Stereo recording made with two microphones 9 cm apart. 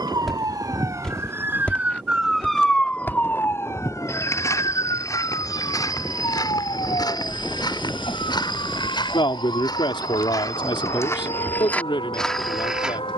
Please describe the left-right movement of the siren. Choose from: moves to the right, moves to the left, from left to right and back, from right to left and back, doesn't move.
moves to the left.